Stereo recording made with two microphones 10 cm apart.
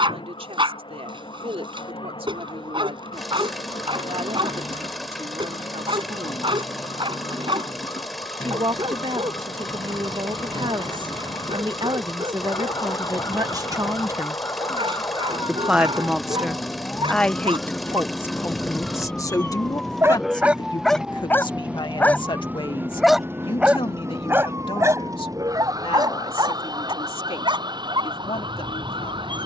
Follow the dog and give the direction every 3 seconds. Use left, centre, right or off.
right, right, right, right, right, right, right, centre, right, right.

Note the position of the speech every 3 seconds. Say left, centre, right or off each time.
right, right, right, right, right, centre, left, left, left, left.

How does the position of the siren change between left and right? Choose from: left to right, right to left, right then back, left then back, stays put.
left to right.